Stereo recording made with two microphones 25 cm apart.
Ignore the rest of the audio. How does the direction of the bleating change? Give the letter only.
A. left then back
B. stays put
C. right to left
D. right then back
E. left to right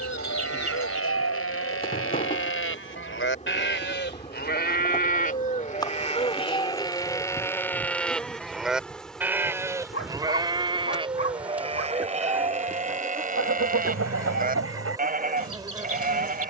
E.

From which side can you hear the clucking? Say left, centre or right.
right.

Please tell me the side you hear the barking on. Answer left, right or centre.
left.